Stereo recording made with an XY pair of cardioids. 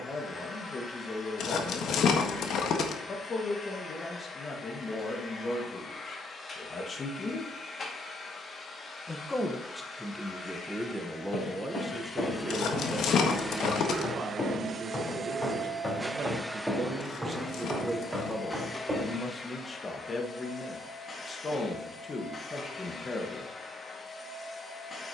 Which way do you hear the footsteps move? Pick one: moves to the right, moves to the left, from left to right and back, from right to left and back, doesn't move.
moves to the right.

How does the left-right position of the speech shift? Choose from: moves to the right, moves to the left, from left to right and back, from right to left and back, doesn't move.
from left to right and back.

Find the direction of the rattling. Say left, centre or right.
left.